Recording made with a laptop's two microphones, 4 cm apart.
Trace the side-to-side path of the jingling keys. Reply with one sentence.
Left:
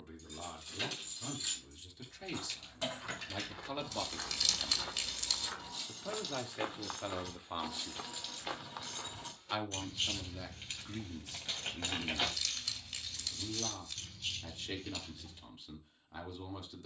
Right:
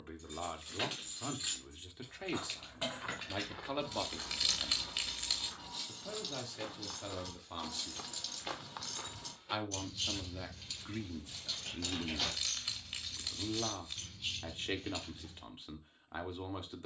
In this clip you hear the jingling keys go left and come back.